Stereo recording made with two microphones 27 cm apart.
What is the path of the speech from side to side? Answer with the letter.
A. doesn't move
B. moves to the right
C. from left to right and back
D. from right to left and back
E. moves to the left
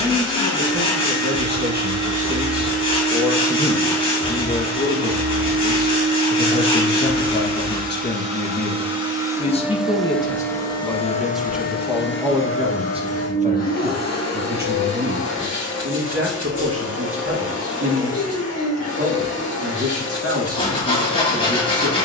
D.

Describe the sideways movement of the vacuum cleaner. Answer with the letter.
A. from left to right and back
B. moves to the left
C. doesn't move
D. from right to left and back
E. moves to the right
B.